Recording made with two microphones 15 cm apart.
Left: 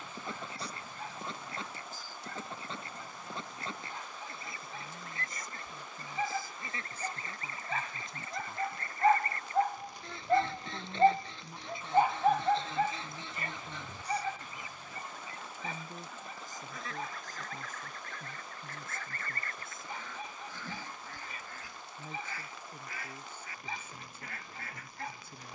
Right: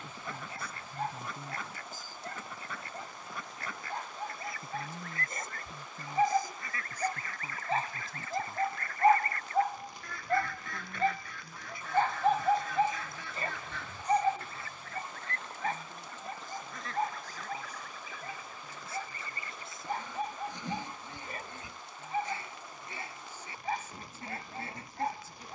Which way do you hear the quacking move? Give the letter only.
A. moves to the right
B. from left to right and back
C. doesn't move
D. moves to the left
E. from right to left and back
A.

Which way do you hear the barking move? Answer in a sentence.
In this clip you hear the barking move from right to left and back again.